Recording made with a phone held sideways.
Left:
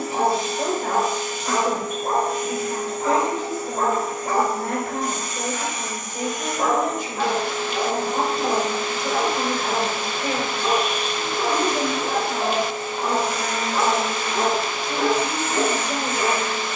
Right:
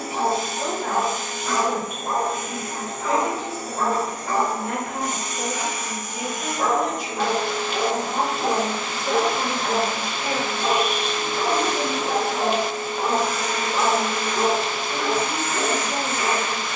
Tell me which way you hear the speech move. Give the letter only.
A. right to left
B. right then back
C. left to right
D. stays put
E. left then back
D.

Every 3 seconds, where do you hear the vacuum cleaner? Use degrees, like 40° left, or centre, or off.
50° right, 30° right, 10° left, 20° left, 20° left, 20° left.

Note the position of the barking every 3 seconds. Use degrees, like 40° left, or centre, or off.
40° left, 40° left, 10° right, 50° right, 10° right, 40° left.